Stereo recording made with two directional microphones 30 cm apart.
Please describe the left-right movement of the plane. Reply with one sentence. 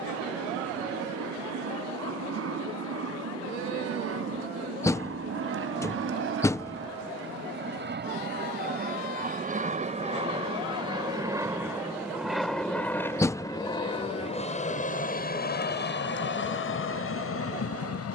In this clip you hear the plane move from right to left.